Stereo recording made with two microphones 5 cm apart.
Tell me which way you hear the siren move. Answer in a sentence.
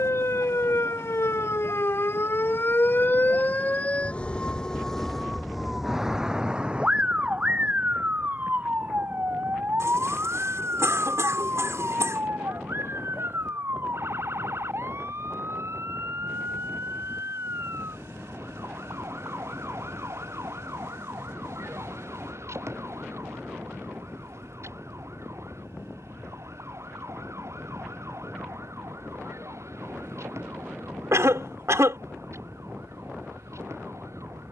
You can hear the siren go from the left side to the right.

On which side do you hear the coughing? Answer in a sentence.
You can hear the coughing on the right.